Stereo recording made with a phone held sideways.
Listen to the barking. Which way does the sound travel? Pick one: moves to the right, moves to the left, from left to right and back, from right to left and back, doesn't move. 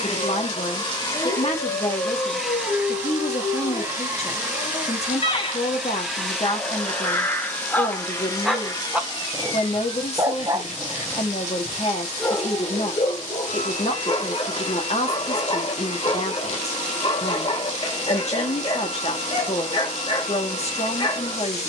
from left to right and back.